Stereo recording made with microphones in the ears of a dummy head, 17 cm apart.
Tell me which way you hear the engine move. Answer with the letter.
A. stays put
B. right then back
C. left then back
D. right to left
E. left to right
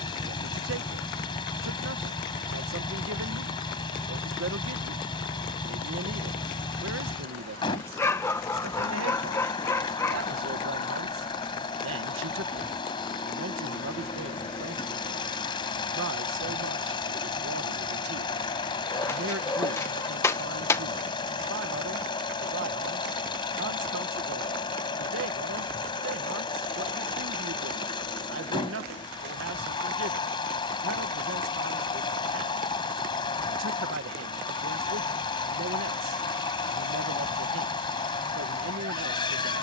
A.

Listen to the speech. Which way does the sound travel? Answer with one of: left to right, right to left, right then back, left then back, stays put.
stays put.